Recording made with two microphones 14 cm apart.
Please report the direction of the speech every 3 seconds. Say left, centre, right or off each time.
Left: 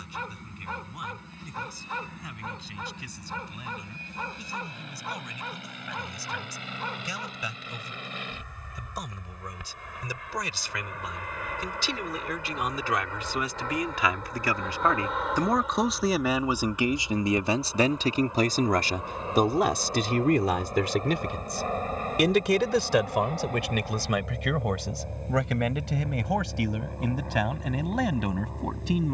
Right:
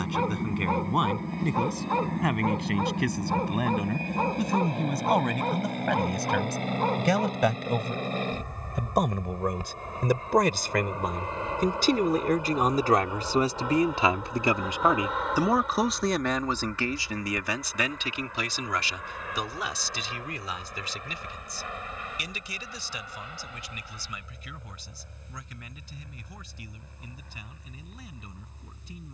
right, right, right, right, right, centre, left, left, left, left.